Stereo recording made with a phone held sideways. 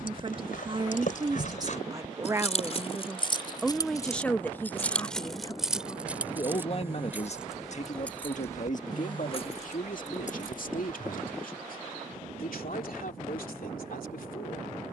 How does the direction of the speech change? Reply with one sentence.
You can hear the speech move to the left.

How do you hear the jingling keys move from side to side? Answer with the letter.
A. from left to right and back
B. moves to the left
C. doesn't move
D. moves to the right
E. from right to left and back
A.